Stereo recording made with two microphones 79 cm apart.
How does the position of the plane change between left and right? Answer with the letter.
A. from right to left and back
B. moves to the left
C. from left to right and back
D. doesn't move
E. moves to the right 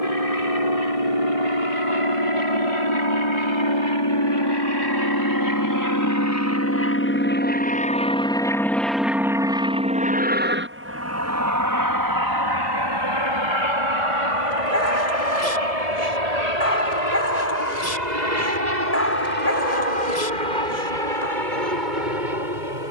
E.